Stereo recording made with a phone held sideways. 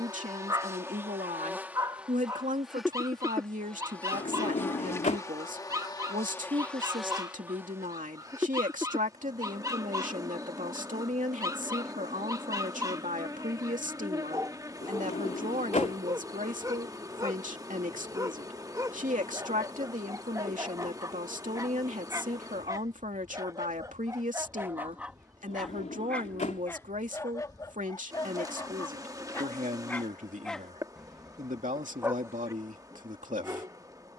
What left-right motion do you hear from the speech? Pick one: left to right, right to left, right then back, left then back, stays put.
stays put.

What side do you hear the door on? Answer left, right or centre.
left.